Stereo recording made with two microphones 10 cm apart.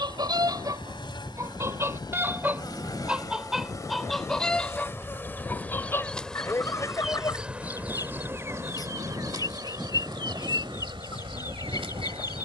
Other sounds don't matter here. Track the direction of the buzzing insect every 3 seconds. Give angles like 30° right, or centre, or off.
50° left, 30° left, 10° right, 50° right.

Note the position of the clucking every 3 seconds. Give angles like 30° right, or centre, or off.
30° right, 10° left, 30° left, 40° left.